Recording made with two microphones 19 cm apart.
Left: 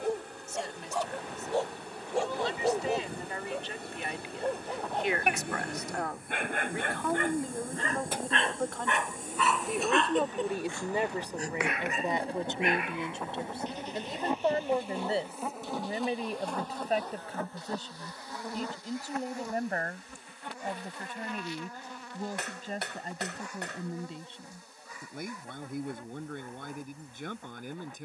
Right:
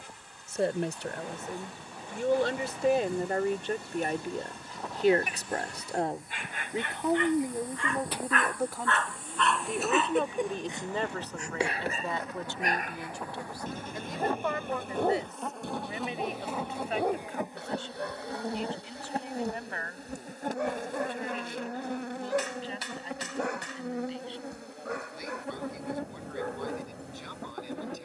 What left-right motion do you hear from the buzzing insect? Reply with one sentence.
In this clip you hear the buzzing insect move to the right.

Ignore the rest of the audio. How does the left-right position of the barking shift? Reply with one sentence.
You can hear the barking move from left to right.